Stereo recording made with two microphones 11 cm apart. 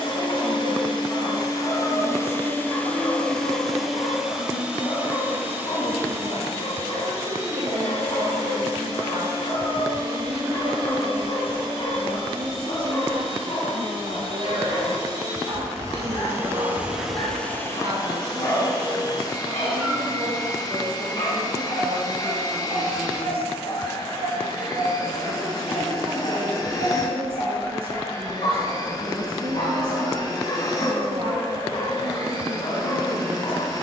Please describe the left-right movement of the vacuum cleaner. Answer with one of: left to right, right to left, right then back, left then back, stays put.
right then back.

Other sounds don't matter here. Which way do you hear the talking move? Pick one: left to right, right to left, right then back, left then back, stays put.
stays put.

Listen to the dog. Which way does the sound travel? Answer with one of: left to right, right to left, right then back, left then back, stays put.
stays put.